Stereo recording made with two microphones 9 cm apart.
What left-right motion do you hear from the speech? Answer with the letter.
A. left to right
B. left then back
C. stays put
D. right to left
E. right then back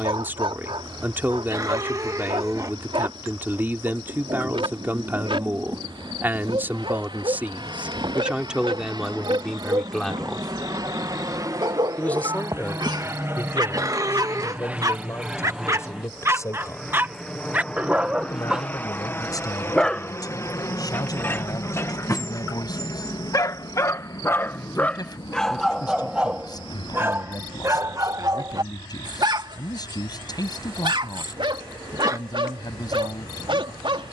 D.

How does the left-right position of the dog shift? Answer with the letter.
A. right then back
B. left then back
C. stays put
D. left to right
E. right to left
B.